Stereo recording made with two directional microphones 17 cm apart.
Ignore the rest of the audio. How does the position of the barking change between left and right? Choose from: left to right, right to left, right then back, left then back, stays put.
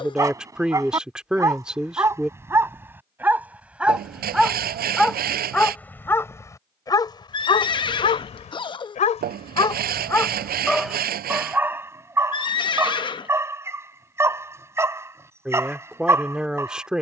left then back.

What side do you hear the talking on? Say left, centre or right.
centre.